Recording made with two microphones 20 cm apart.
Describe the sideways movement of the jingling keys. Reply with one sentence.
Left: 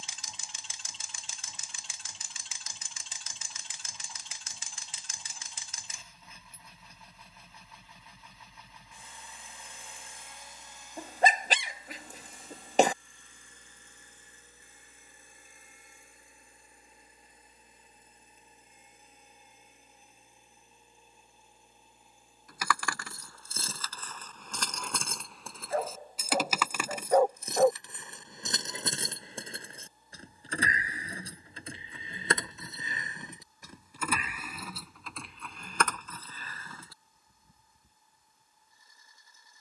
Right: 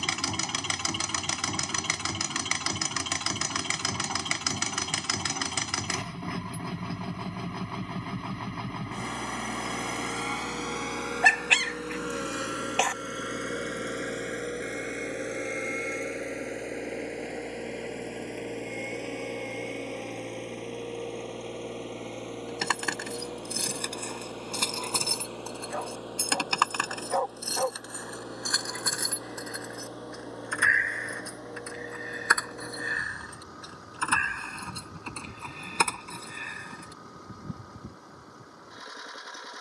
In this clip you hear the jingling keys move from right to left and back again.